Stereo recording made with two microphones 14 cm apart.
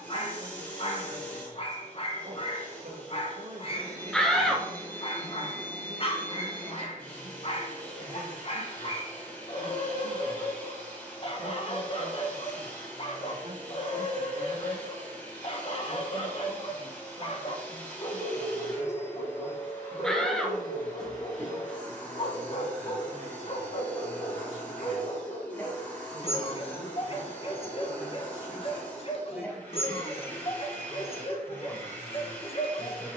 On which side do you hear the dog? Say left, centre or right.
left.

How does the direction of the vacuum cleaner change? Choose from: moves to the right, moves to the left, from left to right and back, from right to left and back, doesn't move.
doesn't move.